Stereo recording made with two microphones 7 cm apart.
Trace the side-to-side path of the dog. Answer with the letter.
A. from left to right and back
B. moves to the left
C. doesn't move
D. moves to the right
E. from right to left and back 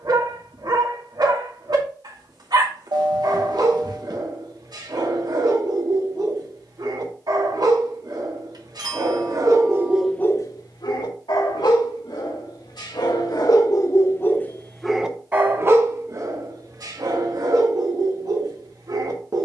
E.